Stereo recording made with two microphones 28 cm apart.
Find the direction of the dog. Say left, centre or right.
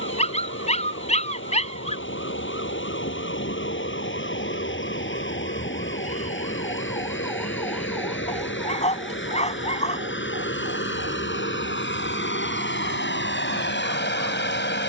left.